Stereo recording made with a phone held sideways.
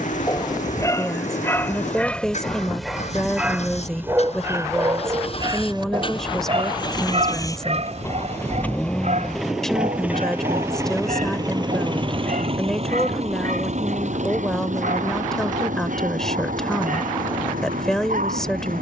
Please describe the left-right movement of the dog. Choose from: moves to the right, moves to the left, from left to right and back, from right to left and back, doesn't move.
moves to the right.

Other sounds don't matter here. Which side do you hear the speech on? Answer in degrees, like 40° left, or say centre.
centre.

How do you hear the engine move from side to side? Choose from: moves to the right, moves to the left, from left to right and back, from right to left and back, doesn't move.
moves to the right.